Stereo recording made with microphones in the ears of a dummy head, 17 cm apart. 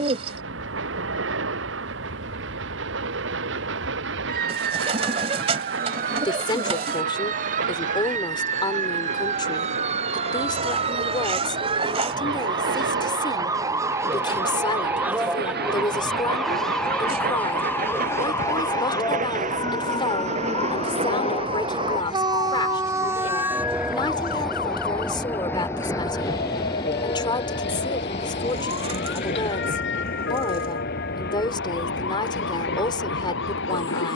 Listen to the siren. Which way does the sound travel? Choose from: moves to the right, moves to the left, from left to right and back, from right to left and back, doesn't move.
moves to the left.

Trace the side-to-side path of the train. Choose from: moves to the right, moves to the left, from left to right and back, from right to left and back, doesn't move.
moves to the left.